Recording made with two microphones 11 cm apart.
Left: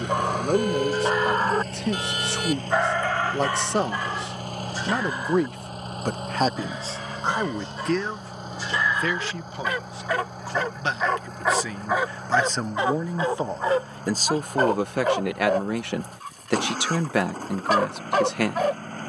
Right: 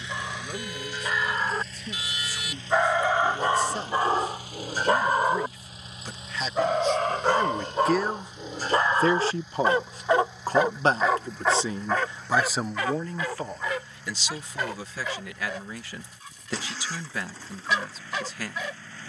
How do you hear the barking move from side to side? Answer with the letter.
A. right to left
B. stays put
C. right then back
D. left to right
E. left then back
C.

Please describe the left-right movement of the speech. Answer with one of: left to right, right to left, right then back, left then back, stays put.
right then back.